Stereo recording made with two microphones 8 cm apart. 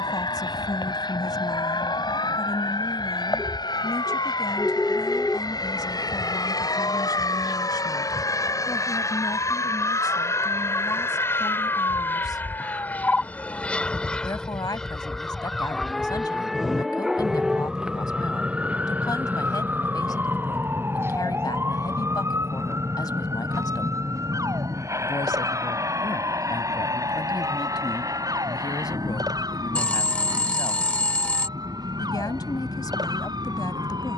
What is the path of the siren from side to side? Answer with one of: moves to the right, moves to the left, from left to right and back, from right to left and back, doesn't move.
moves to the right.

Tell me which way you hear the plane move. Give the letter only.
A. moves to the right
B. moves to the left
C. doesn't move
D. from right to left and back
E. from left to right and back
A.